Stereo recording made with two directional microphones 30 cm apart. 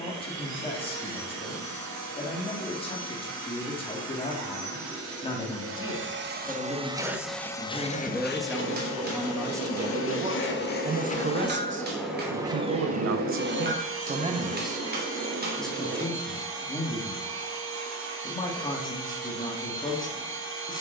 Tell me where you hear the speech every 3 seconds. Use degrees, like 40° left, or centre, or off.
20° left, 20° left, 10° left, 20° right, 40° right, 10° left, 10° left.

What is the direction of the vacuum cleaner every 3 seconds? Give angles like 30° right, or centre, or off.
60° right, 60° right, 10° left, 30° left, 30° right, 60° right, 60° right.